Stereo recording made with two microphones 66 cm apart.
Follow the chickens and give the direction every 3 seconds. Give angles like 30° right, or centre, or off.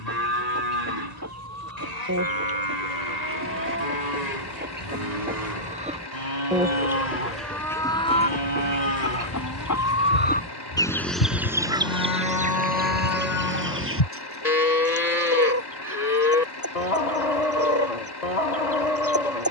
20° right, 20° right, centre, 10° left, 20° right, 20° right, 20° right.